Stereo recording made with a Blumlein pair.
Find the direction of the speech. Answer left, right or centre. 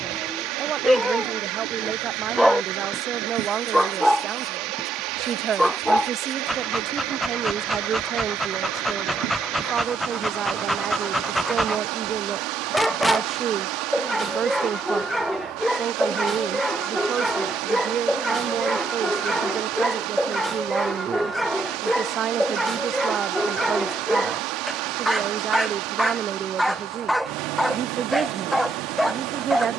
right.